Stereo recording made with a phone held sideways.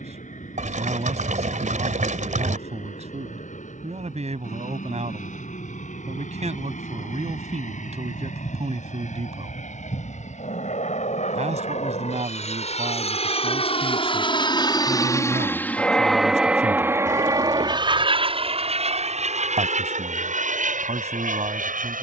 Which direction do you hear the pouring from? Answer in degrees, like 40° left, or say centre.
70° right.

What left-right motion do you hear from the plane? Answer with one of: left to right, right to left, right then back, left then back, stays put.
left to right.